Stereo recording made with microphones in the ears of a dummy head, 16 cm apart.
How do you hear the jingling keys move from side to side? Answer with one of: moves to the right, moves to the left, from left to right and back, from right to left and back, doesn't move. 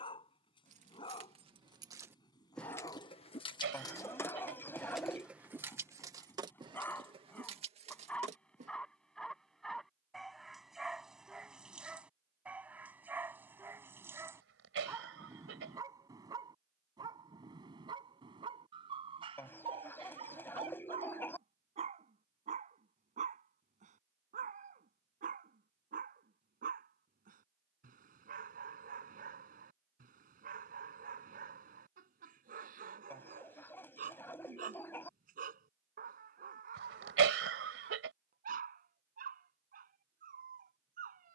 from right to left and back.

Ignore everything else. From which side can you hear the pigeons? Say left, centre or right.
centre.